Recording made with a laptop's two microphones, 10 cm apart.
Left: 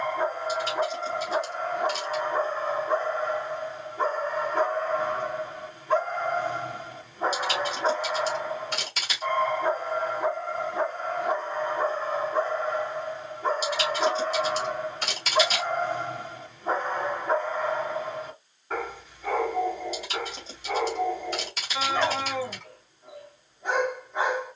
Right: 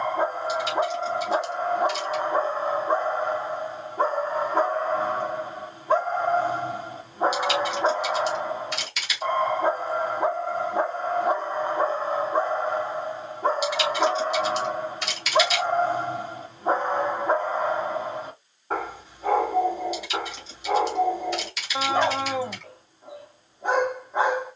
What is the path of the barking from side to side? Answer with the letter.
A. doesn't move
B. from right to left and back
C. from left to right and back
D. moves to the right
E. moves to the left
A.